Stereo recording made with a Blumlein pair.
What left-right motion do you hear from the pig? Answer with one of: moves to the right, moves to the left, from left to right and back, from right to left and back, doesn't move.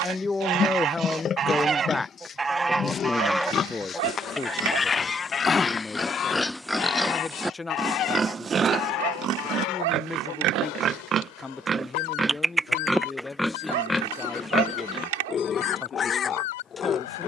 from left to right and back.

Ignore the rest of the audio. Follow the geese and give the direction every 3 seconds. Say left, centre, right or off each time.
right, centre, left, left, left, left.